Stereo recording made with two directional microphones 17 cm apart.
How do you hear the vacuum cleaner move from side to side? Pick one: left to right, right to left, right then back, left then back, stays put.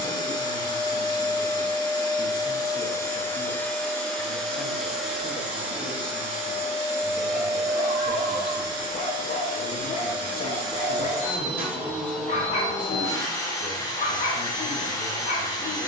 right then back.